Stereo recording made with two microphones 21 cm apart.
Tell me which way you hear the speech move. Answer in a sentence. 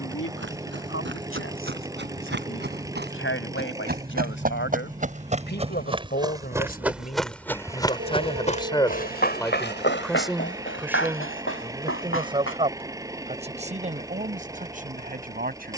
You can hear the speech move from left to right.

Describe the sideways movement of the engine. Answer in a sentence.
You can hear the engine stay put.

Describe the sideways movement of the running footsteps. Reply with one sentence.
You can hear the running footsteps travel towards the left.